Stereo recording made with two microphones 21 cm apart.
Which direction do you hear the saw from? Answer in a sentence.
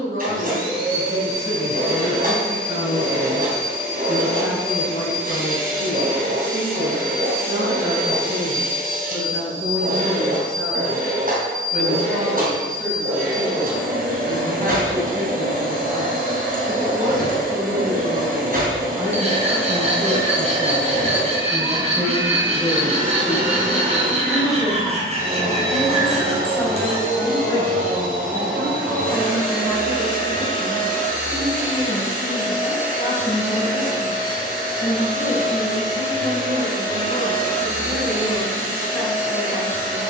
You can hear the saw on the right.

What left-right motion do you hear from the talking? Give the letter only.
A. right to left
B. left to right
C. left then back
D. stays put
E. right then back
A.